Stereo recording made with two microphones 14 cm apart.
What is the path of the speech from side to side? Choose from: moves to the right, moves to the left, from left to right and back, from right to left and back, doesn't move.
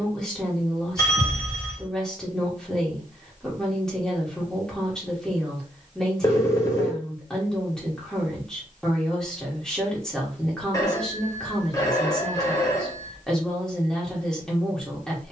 doesn't move.